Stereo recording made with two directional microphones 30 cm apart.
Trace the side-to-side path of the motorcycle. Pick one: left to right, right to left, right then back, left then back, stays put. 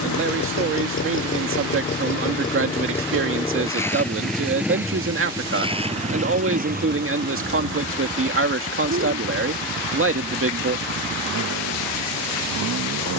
left to right.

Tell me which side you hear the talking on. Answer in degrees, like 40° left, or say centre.
40° right.